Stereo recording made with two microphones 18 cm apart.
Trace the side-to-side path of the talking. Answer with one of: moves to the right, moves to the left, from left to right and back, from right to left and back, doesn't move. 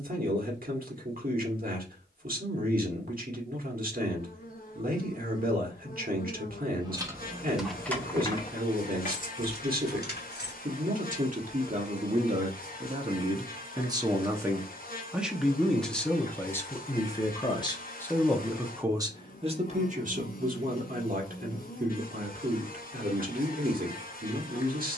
from right to left and back.